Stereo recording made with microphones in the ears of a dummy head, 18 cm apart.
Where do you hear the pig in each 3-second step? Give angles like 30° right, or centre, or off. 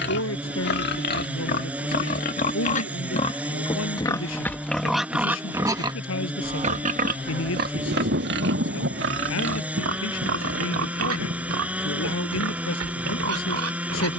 50° left, 10° left, 50° right, 70° right, 80° right.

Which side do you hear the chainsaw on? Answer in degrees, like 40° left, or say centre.
10° right.